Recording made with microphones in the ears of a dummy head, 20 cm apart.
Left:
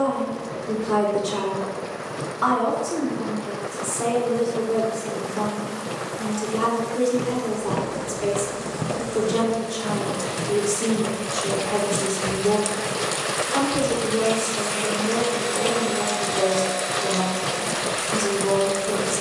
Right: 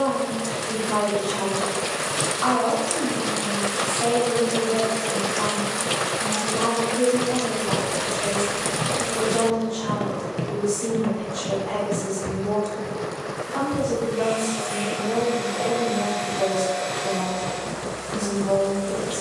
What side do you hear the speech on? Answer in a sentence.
You can hear the speech on the left.